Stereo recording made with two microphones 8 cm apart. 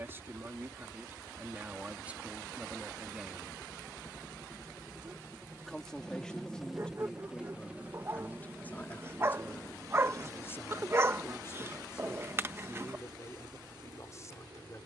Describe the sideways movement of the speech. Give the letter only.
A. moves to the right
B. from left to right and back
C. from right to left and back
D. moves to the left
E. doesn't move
D.